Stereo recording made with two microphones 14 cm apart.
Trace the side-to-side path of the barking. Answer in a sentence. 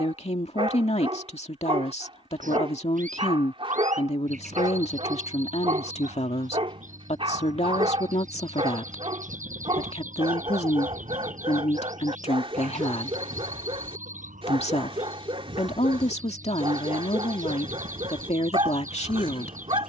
You can hear the barking stay in one place.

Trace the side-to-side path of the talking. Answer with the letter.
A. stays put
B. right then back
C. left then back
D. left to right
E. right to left
A.